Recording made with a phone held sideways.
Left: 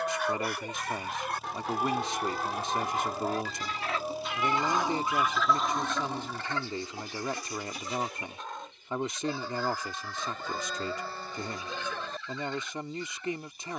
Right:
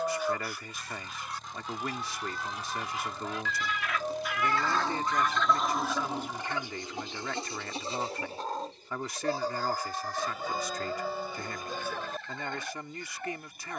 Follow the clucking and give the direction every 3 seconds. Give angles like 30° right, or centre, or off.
70° left, 20° left, 30° right, 50° right, 50° right.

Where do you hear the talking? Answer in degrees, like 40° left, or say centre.
20° left.